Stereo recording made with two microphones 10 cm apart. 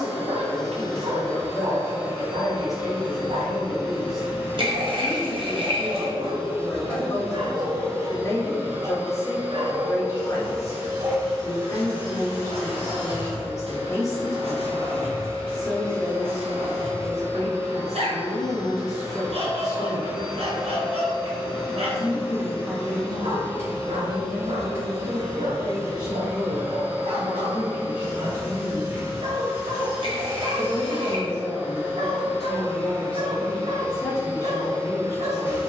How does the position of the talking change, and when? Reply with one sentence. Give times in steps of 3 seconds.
In this clip you hear the talking on the left from 0 s, in the centre from 21 s, on the right from 24 s, in the centre from 30 s and on the left from 33 s.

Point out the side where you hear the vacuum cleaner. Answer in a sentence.
In this clip you hear the vacuum cleaner on the right.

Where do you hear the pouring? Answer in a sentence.
You can hear the pouring on the right.